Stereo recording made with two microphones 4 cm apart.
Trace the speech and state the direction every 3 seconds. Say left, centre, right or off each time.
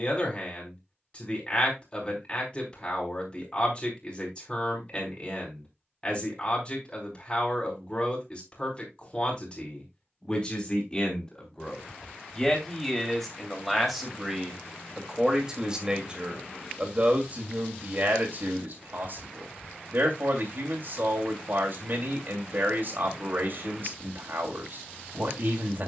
left, left, left, left, centre, right, right, right, right.